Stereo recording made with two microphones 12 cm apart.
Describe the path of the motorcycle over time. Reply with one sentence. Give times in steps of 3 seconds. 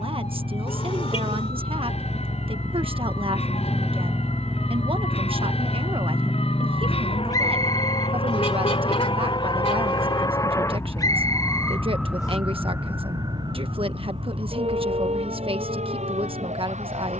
In this clip you hear the motorcycle on the right from 0 s, in the centre from 3 s and on the left from 6 s.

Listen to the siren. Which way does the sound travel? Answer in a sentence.
In this clip you hear the siren travel towards the right.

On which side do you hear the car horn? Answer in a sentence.
You can hear the car horn on the left.